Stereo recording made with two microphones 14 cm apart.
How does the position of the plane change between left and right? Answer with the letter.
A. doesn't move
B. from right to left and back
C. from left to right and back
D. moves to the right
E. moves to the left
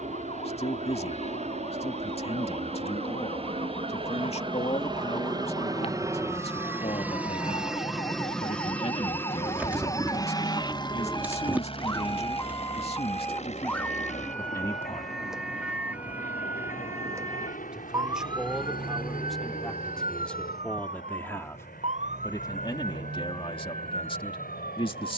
E.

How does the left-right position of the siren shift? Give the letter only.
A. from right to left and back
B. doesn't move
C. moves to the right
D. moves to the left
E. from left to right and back
C.